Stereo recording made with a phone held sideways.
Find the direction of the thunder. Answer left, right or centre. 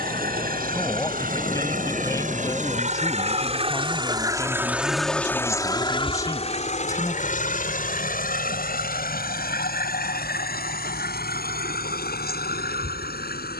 left.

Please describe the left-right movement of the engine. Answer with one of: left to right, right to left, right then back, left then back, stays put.
right to left.